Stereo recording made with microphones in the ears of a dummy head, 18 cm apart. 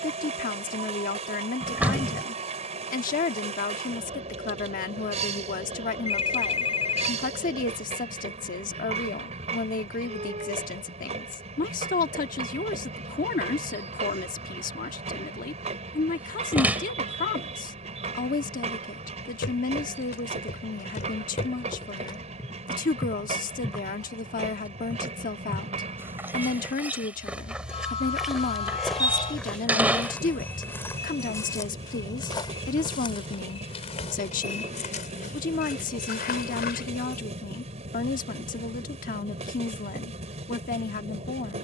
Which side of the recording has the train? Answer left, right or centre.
right.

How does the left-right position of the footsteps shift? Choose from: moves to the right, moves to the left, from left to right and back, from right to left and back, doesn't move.
from left to right and back.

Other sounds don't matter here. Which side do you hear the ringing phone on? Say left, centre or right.
left.